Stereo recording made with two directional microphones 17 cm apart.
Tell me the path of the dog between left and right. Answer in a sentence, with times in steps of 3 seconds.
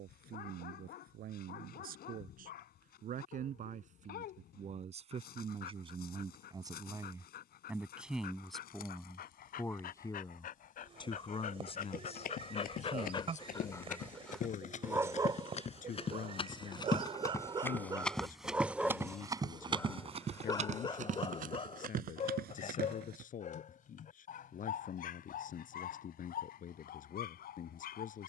You can hear the dog on the left from 0 s, on the right from 15 s, in the centre from 18 s and on the left from 21 s.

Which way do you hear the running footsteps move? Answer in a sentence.
In this clip you hear the running footsteps move to the right.